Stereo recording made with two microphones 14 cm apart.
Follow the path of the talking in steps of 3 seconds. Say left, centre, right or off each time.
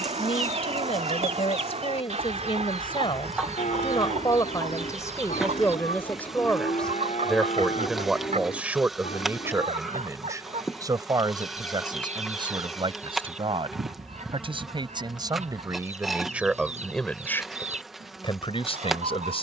left, left, centre, right, right, centre, left.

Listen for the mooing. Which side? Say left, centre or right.
left.